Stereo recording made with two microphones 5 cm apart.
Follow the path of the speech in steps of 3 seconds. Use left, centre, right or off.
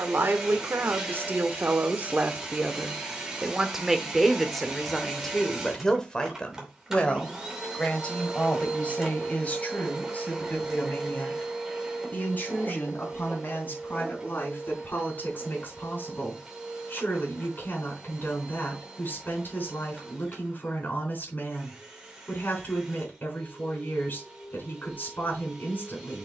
right, centre, left, left, left, left, left, left, left.